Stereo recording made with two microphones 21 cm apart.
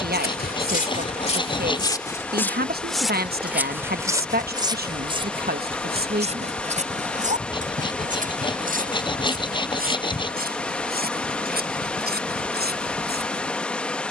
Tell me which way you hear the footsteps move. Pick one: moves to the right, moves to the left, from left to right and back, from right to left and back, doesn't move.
moves to the right.